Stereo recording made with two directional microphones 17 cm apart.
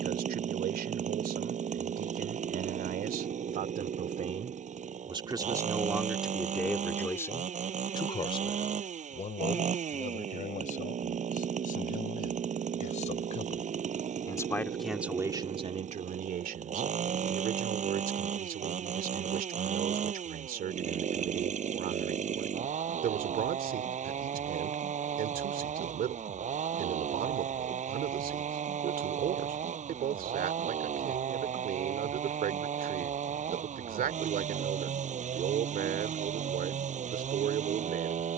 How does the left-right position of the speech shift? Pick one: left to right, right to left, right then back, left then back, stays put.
left then back.